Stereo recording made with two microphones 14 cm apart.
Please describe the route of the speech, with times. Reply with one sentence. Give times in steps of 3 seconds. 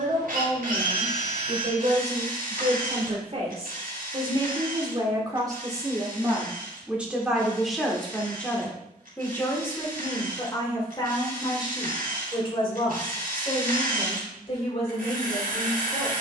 You can hear the speech on the right from 0 s, in the centre from 6 s and on the left from 9 s.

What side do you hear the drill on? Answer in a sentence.
You can hear the drill on the right.